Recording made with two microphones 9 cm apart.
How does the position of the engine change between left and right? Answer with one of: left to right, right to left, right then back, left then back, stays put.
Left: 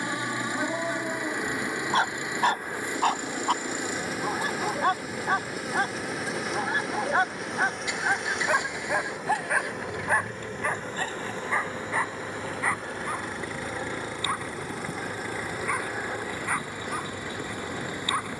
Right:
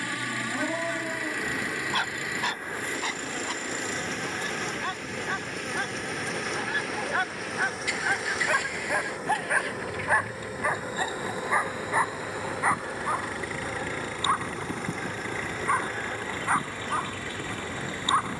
stays put.